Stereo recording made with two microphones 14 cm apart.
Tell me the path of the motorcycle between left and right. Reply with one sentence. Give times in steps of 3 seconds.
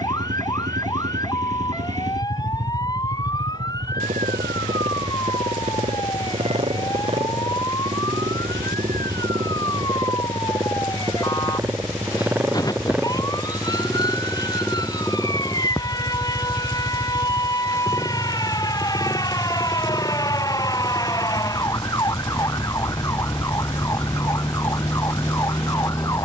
You can hear the motorcycle on the right from 0 s, in the centre from 12 s, on the left from 18 s and not at all from 24 s.